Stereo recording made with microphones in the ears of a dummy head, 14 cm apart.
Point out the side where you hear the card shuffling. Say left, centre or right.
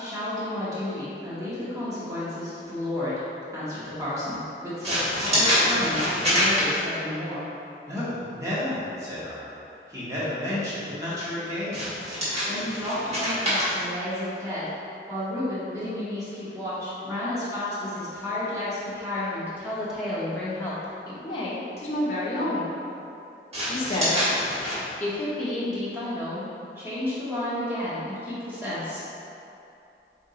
right.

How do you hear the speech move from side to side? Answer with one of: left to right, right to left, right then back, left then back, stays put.
left then back.